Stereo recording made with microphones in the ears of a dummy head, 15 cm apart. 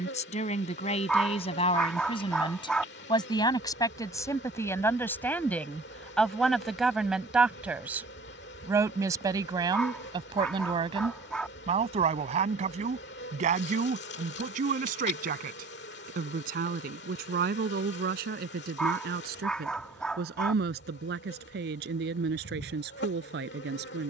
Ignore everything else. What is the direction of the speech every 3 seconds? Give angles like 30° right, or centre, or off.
40° left, 20° left, 10° right, 30° right, 50° right, 60° right, 60° right, 70° right.